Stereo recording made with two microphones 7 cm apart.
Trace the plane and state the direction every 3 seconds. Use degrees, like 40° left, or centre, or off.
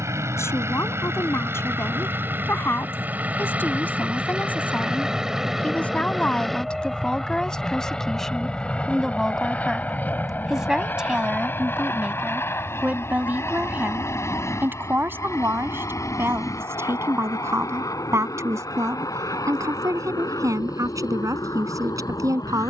30° right, 10° right, 10° left, 20° left, 30° left, 40° left, 50° left, 50° left.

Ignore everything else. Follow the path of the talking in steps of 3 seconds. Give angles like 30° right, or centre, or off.
30° left, 20° left, 10° left, 10° right, 20° right, 30° right, 50° right, 50° right.